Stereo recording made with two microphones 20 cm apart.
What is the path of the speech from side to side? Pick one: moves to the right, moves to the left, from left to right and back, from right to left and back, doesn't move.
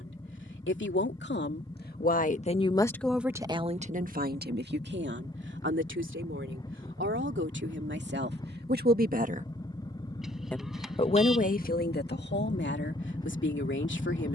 from left to right and back.